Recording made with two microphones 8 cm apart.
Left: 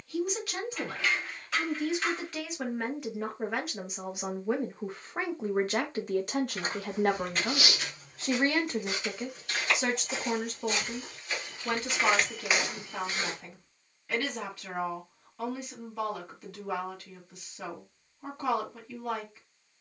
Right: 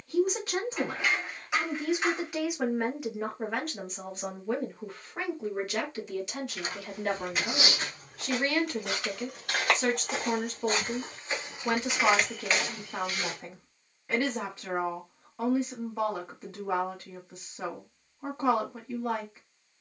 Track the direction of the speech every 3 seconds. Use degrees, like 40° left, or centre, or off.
20° right, 20° left, 40° left, centre, 20° right, 20° right, 20° right.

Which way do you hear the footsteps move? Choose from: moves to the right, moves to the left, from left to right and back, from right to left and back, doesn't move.
from left to right and back.